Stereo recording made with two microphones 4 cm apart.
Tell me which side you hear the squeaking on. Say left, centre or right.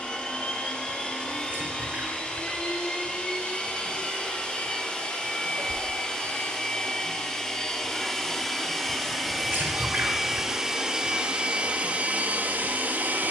right.